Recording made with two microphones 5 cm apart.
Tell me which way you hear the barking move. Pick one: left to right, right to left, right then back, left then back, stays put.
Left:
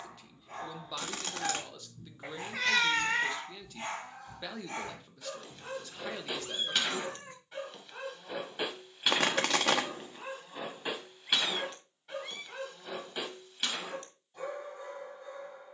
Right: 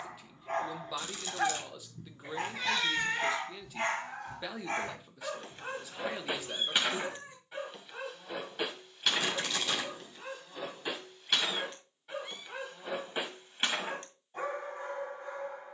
left then back.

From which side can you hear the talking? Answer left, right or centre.
centre.